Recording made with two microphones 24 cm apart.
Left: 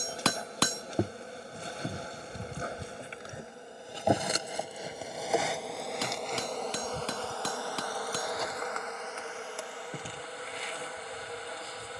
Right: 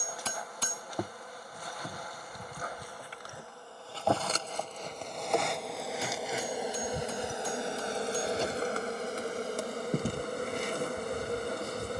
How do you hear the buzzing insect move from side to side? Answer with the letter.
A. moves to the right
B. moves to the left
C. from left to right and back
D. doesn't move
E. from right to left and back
A.